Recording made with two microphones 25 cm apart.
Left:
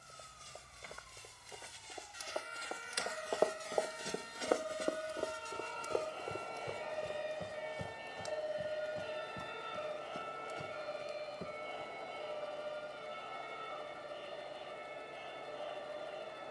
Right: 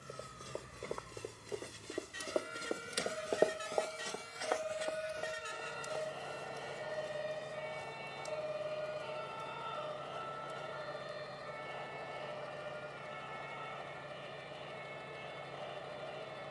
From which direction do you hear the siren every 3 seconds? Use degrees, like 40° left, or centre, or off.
50° right, 30° right, centre, 20° left, 40° left, 50° left.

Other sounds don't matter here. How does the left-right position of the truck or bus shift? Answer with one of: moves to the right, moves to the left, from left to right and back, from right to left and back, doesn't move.
doesn't move.